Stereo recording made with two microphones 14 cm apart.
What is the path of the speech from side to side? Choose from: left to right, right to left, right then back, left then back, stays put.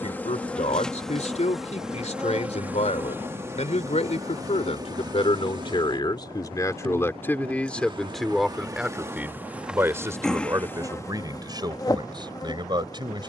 left to right.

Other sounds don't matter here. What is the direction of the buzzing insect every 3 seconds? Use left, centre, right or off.
centre, right, right, centre, left.